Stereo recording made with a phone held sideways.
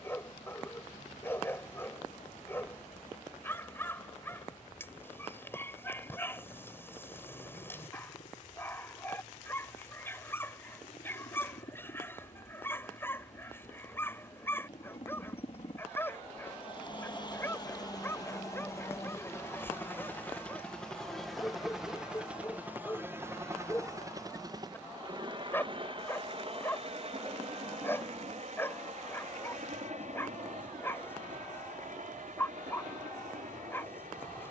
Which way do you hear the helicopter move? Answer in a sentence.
In this clip you hear the helicopter travel towards the right.